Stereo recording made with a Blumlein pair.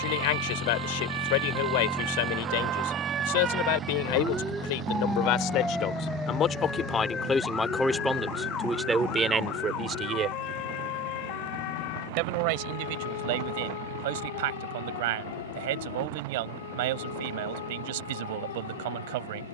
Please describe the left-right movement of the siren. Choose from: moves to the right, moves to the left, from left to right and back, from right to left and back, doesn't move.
moves to the left.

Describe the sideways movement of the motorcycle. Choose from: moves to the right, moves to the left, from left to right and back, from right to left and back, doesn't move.
moves to the right.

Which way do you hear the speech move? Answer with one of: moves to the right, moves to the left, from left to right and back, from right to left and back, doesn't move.
moves to the right.